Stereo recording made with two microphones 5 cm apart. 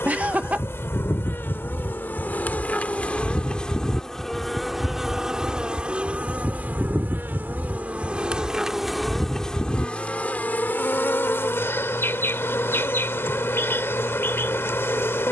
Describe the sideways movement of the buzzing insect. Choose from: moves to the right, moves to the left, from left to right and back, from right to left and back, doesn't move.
from left to right and back.